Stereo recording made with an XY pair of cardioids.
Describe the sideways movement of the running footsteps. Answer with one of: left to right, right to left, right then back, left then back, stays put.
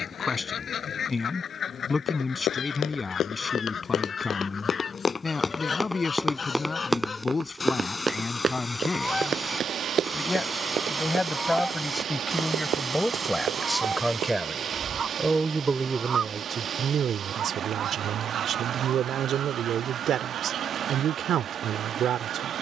left to right.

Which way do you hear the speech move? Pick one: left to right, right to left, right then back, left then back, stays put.
left to right.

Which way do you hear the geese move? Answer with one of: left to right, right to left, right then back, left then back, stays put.
left to right.